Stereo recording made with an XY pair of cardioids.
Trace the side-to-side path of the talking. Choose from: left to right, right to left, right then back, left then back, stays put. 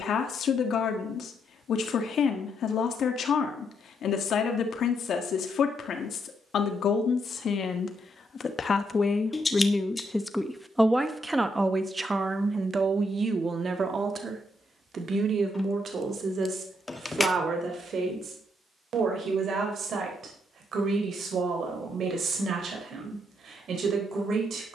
left to right.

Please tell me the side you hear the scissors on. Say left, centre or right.
left.